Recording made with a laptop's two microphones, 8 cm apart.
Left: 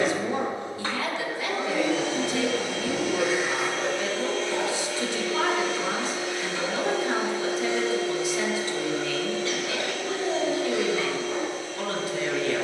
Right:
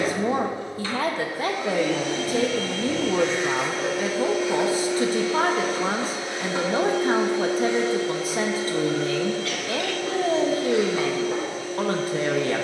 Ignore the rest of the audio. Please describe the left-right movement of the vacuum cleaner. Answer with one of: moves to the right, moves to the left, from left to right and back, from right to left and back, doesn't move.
moves to the right.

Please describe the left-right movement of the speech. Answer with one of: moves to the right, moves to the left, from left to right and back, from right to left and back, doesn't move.
doesn't move.